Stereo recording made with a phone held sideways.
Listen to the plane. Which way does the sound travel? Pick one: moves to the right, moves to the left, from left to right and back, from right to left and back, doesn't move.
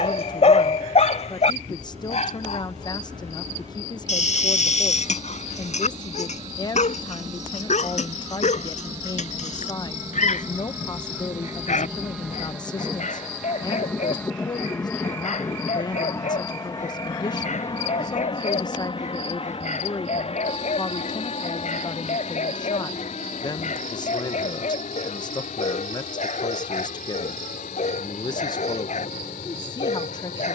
moves to the left.